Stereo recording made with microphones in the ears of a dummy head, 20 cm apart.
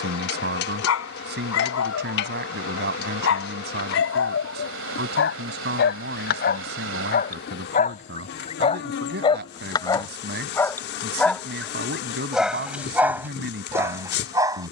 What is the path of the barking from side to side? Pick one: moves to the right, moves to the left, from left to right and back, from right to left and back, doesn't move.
moves to the right.